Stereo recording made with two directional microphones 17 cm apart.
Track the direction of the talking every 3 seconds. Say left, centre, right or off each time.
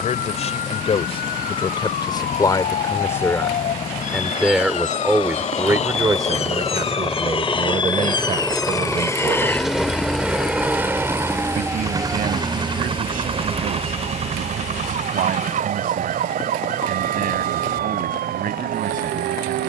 left, centre, right, right, right, right, right.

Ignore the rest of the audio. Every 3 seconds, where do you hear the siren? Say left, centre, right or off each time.
left, left, left, centre, right, right, right.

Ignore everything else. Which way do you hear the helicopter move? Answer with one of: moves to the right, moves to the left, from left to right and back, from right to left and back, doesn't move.
moves to the right.